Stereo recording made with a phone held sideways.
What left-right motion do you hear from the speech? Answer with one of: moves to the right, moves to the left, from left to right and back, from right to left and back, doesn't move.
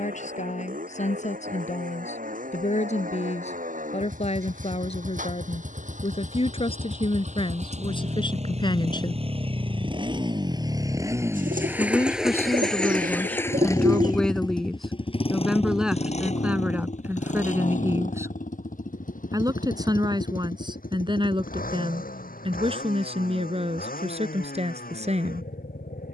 moves to the right.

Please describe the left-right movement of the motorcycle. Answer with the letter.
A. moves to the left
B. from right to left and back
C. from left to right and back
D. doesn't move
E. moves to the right
A.